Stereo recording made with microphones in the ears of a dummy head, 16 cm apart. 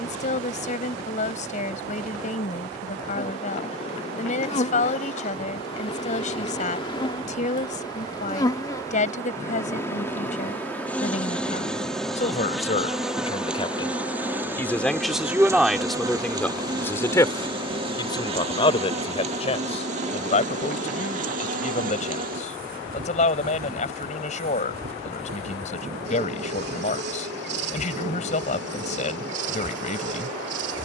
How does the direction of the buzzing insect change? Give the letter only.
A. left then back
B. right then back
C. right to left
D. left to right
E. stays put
D.